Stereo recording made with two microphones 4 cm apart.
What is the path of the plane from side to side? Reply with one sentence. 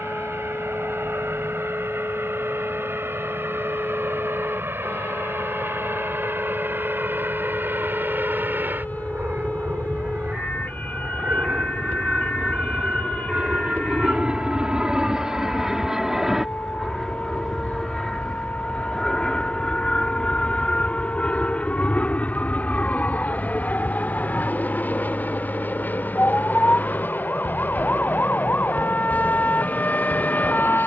In this clip you hear the plane move from right to left.